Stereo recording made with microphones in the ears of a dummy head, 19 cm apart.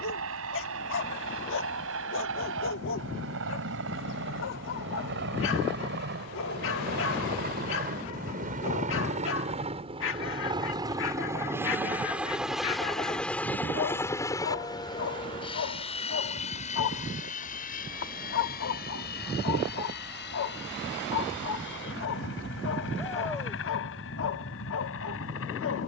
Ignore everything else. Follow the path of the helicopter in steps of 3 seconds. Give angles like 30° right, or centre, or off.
70° right, 60° right, 40° right, 20° right, 10° left, 30° left, 40° left, 50° left, 60° left.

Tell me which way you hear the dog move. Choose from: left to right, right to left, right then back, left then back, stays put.
stays put.